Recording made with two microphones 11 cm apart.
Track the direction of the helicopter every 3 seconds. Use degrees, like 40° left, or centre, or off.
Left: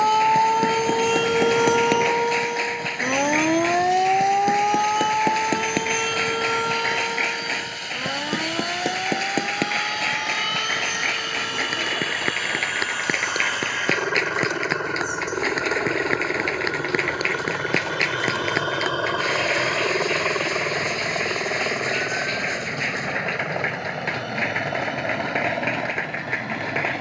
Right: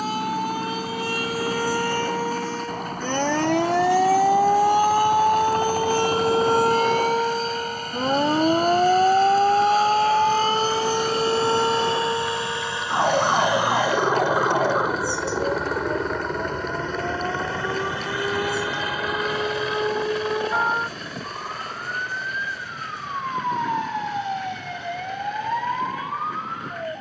60° right, 50° right, 50° right, 30° right, 20° right, 10° left, 30° left, 50° left, 60° left.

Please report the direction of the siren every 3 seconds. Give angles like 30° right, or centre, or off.
30° left, 10° right, 30° right, 50° right, 50° right, 60° right, 60° right, 70° right, 70° right.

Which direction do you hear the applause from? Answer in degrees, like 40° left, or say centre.
70° left.